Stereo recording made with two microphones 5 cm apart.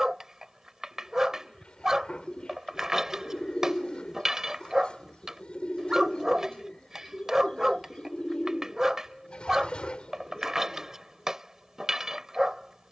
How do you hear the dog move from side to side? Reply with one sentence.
In this clip you hear the dog stay put.